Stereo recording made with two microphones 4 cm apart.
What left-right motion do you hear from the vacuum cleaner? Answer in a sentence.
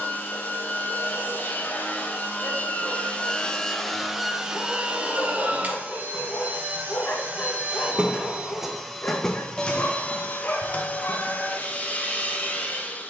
In this clip you hear the vacuum cleaner go right and come back.